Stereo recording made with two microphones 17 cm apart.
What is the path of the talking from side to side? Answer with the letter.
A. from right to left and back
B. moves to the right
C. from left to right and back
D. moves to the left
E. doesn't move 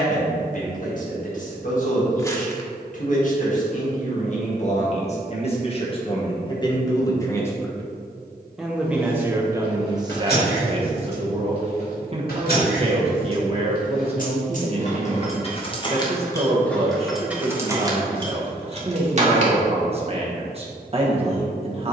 B.